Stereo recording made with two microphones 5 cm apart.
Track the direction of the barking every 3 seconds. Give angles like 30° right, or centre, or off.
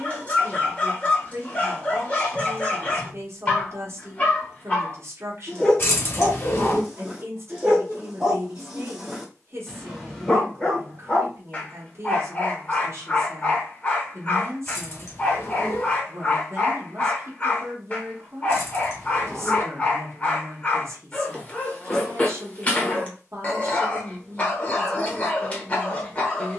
30° left, 30° left, 10° right, 10° left, 30° left, 30° left, 30° left, 30° left, 30° left.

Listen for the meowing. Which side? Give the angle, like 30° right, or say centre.
50° left.